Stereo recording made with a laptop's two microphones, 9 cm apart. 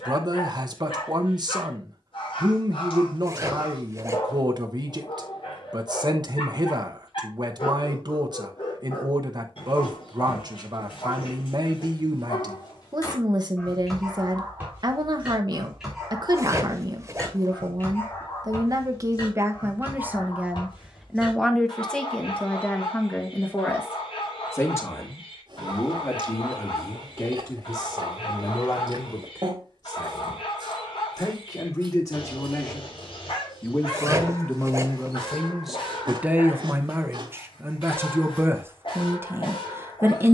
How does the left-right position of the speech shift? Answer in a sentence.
You can hear the speech move from right to left and back again.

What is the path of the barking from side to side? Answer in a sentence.
You can hear the barking go right and come back.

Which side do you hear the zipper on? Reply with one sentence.
In this clip you hear the zipper on the right.